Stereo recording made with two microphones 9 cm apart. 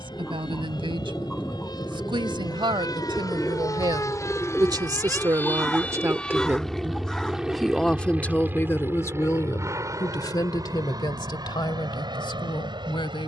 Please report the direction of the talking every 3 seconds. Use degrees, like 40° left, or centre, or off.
70° right, 50° right, centre, 50° left, 60° left.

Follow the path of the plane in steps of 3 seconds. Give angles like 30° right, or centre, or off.
60° left, 30° left, 10° right, 40° right, 50° right.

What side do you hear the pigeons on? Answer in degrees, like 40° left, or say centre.
10° left.